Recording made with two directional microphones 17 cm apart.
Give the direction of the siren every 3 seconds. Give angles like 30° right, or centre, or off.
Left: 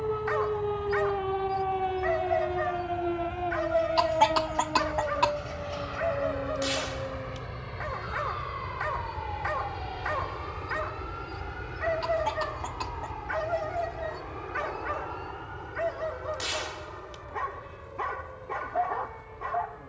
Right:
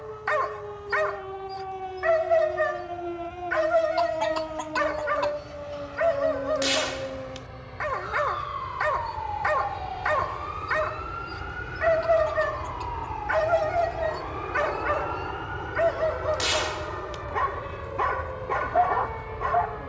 40° left, centre, 20° right, 40° right, 50° right, 50° right, 50° right.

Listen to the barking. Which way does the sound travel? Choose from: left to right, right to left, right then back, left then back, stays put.
stays put.